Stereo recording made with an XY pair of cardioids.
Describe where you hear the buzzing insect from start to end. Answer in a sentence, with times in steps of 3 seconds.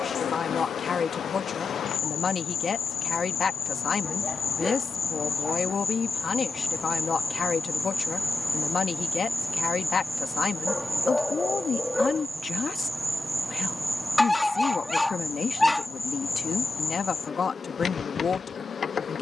In this clip you hear the buzzing insect on the left from 0 s, in the centre from 9 s and on the left from 15 s.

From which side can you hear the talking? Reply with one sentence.
In this clip you hear the talking on the left.